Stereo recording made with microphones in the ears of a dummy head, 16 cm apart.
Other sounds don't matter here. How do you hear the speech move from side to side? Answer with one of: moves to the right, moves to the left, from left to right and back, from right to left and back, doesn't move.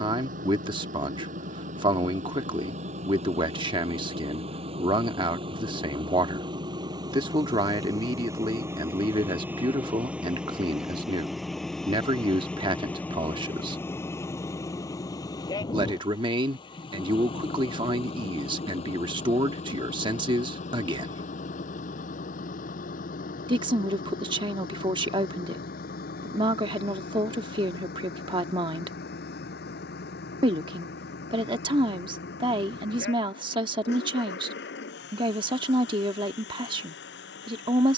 doesn't move.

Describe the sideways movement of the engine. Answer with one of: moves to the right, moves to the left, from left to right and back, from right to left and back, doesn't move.
moves to the left.